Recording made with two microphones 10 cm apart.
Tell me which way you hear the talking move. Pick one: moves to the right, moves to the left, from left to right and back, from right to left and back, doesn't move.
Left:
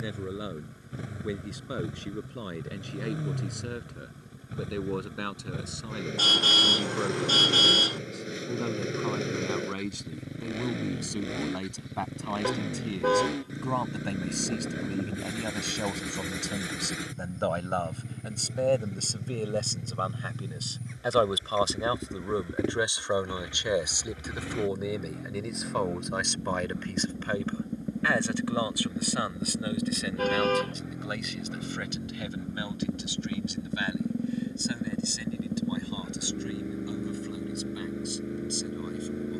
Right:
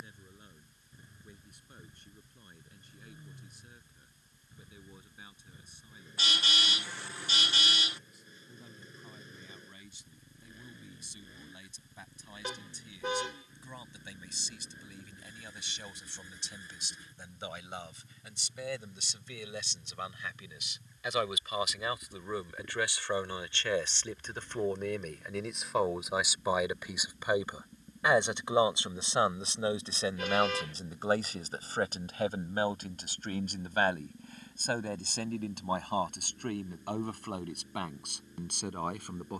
moves to the right.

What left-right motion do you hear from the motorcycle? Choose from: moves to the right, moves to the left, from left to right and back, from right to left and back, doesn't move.
doesn't move.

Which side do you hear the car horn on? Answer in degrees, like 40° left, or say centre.
40° left.